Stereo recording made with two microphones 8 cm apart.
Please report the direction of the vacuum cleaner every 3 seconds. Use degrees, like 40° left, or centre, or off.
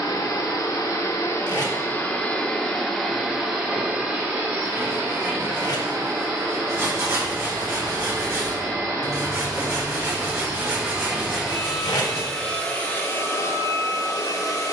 30° left, 20° right, 40° right, 20° right, 30° left.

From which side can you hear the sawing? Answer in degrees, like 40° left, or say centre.
40° right.